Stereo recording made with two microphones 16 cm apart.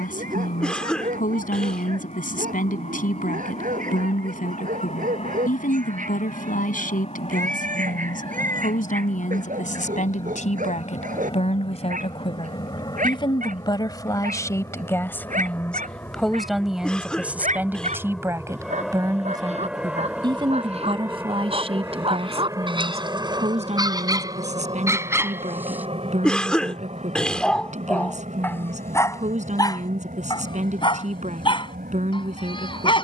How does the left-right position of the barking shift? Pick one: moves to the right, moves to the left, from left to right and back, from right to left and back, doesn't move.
moves to the left.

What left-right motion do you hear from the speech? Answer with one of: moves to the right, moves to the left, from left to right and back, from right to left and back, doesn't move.
moves to the right.